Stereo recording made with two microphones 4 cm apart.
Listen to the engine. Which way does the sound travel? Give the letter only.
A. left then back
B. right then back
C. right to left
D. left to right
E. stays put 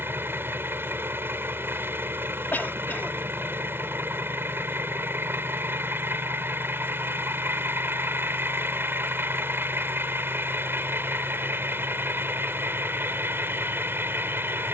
E.